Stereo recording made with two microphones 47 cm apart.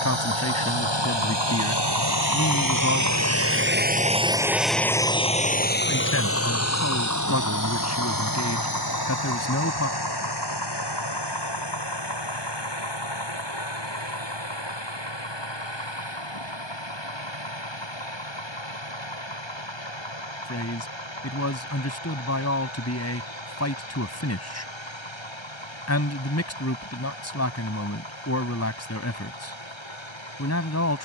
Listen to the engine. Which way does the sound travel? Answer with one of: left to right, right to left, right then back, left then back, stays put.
right to left.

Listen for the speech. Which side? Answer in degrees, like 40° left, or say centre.
30° left.